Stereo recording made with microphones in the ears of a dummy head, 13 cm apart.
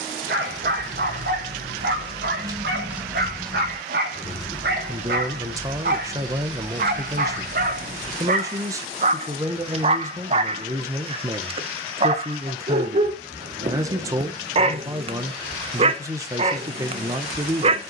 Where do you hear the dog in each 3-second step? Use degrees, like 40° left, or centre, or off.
70° right, 70° right, 60° right, 40° right, 40° right, 40° right.